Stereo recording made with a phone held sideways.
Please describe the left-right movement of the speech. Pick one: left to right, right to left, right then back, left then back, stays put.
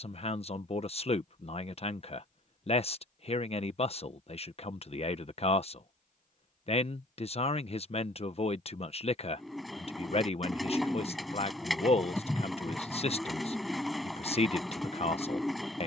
stays put.